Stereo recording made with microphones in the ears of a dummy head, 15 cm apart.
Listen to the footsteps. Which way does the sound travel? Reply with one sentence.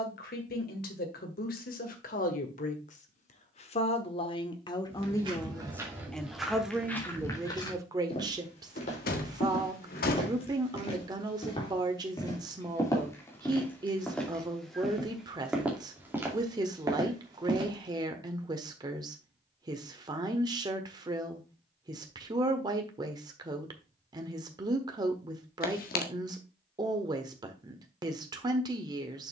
You can hear the footsteps move from right to left and back again.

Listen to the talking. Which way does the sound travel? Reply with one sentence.
In this clip you hear the talking travel towards the right.